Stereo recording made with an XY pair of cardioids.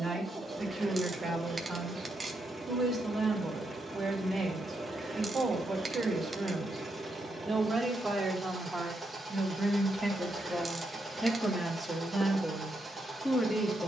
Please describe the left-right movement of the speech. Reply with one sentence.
You can hear the speech move to the left.